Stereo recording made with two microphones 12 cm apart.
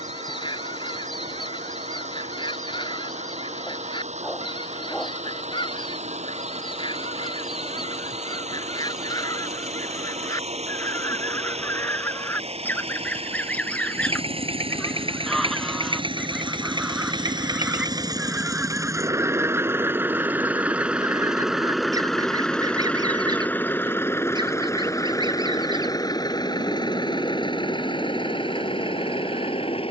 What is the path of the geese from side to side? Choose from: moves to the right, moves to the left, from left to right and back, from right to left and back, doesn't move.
moves to the right.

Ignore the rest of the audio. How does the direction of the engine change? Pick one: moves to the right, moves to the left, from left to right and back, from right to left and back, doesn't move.
moves to the left.